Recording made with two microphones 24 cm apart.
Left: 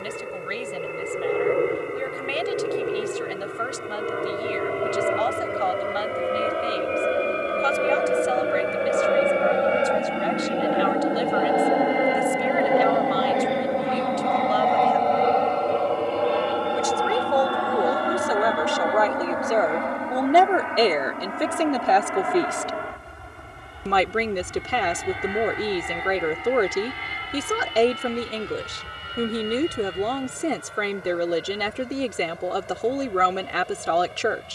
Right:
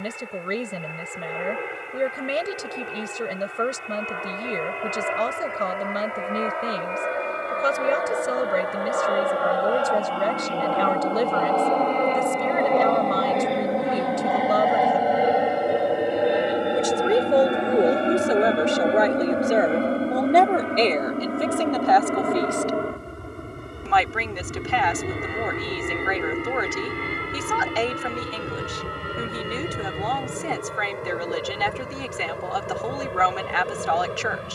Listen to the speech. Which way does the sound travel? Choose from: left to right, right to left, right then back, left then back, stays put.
right to left.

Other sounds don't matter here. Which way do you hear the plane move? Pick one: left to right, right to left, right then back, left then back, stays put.
left to right.